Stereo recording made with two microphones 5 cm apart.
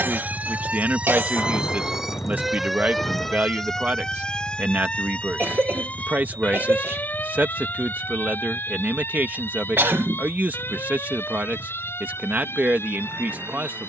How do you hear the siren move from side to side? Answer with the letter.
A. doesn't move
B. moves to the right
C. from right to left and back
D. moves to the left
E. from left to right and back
D.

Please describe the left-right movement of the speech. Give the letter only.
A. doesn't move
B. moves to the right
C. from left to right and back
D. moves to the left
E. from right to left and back
A.